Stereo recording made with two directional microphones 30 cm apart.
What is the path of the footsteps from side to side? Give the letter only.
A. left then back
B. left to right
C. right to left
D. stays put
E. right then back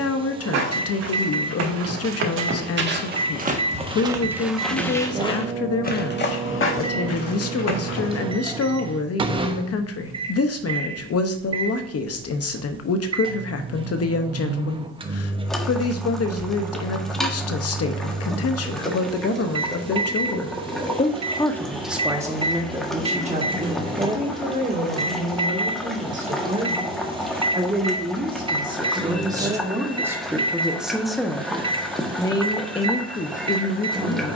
C.